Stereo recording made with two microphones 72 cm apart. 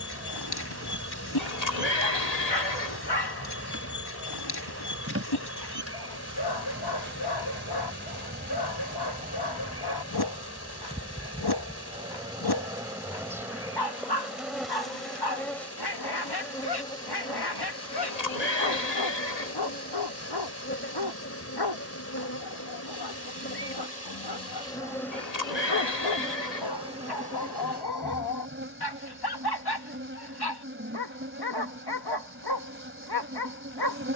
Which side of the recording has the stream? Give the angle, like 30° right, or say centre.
20° left.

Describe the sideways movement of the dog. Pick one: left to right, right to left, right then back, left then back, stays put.
stays put.